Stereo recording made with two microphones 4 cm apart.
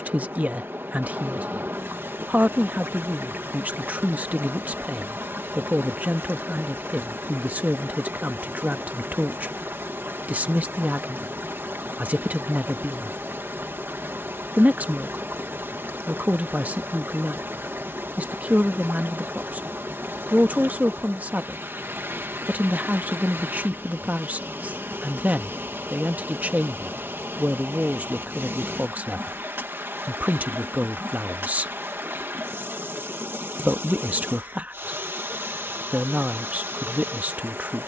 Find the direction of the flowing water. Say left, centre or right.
right.